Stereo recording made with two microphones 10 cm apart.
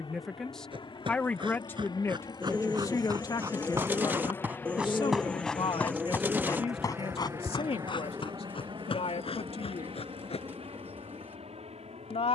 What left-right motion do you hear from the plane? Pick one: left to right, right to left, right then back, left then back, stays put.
left to right.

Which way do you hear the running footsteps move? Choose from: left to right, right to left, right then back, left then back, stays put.
right to left.